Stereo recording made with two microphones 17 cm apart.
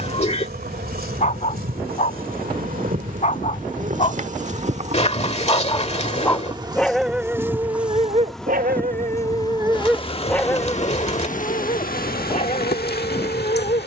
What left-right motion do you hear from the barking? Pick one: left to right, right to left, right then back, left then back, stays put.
right then back.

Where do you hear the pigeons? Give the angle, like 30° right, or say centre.
30° left.